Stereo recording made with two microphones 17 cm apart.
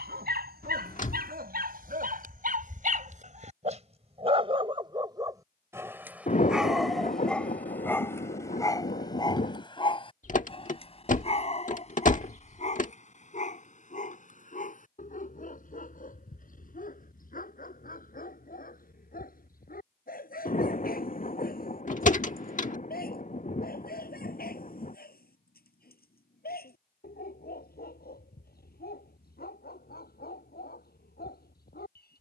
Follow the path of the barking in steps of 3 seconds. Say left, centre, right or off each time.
right, right, centre, left, left, left, left, left, left, left, left.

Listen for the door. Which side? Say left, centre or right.
left.